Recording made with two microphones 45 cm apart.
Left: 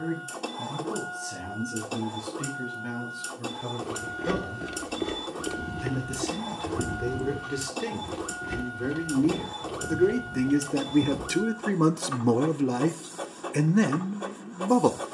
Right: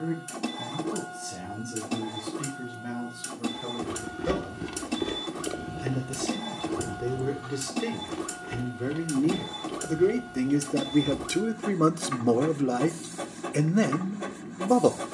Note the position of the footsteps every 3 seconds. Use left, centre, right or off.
off, centre, left, left, off.